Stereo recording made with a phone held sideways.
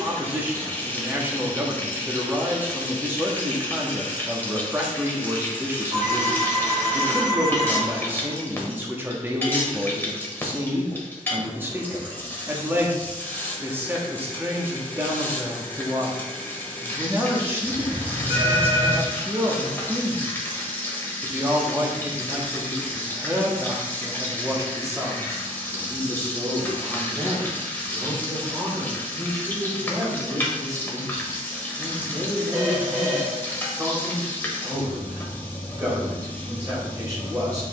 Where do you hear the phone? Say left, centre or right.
right.